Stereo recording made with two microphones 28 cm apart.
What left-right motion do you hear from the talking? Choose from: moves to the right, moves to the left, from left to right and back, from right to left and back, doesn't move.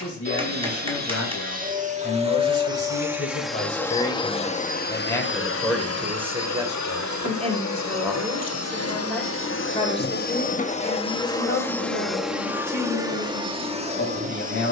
from left to right and back.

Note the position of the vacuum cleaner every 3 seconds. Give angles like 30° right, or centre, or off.
30° right, 20° left, 60° left, 30° left, 10° right.